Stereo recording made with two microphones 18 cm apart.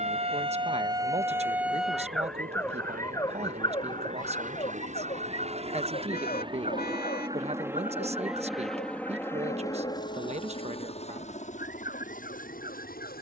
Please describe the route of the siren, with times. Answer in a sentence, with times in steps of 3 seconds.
You can hear the siren in the centre from 0 s and on the left from 3 s.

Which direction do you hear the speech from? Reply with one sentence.
You can hear the speech on the right.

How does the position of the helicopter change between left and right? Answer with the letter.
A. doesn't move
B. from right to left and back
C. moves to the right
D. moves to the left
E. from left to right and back
D.